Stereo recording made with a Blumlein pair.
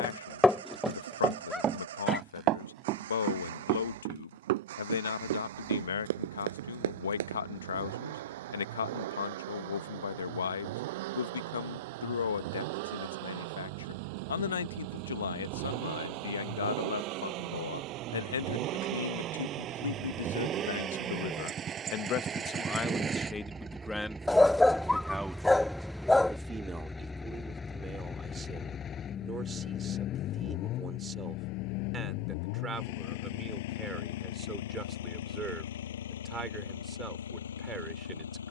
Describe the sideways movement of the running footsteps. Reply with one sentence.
You can hear the running footsteps travel towards the right.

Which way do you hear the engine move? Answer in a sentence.
You can hear the engine move to the left.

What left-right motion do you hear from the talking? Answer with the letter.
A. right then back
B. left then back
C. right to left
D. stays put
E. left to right
E.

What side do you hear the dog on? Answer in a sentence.
In this clip you hear the dog in the centre.